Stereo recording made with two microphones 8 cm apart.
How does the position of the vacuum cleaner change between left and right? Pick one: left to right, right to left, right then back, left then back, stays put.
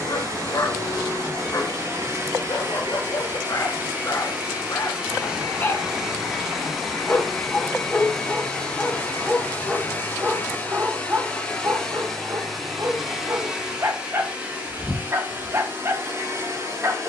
left then back.